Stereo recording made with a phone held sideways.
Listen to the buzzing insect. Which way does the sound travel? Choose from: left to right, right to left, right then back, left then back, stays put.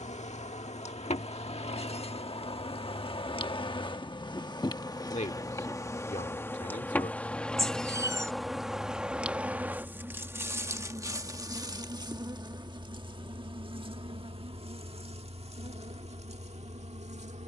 left to right.